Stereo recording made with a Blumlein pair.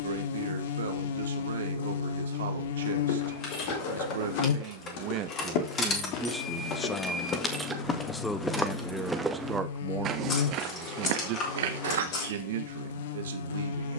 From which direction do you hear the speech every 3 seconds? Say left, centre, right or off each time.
right, right, centre, right, right.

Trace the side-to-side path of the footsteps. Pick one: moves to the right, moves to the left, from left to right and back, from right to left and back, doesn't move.
moves to the right.